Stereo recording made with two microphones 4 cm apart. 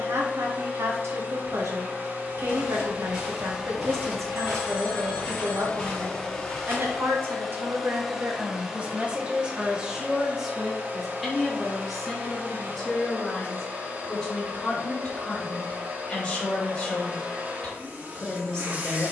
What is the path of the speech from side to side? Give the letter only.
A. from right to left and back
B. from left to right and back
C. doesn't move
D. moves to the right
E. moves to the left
E.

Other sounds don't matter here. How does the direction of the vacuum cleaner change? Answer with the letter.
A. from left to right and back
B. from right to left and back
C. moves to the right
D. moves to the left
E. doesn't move
B.